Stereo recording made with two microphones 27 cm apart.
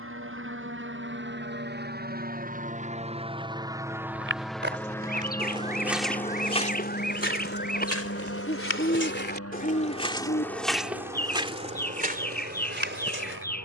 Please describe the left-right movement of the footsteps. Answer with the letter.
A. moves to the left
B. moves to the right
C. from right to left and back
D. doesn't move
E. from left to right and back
C.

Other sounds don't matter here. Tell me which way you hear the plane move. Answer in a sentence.
In this clip you hear the plane move to the left.